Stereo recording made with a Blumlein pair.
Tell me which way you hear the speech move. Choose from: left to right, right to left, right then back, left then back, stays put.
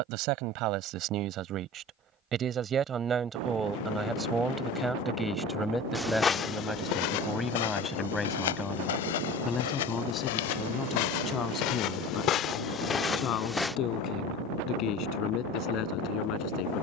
right to left.